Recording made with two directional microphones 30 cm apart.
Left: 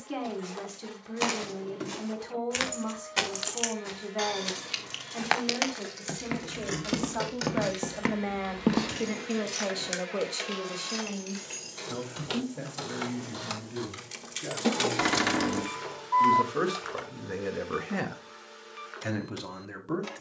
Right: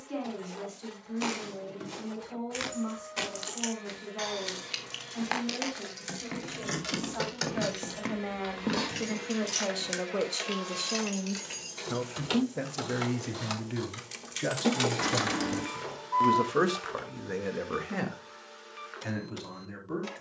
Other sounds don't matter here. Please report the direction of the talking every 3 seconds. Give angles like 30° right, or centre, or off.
40° left, 40° left, 30° left, 10° right, 60° right, 30° right, 30° left.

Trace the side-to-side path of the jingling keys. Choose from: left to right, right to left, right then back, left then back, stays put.
right then back.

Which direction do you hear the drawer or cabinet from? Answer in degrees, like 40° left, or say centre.
40° left.